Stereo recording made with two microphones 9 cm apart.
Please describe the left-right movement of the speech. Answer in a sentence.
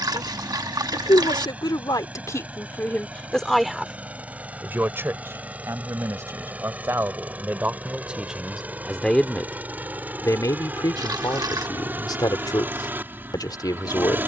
You can hear the speech move from left to right and back again.